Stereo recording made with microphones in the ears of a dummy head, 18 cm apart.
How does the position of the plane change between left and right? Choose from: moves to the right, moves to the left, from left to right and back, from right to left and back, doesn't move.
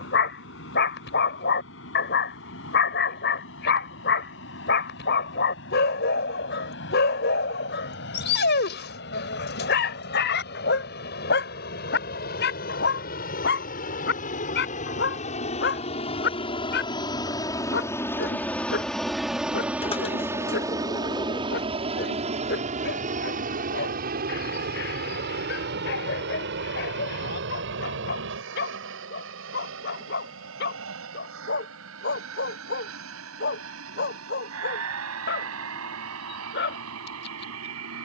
moves to the right.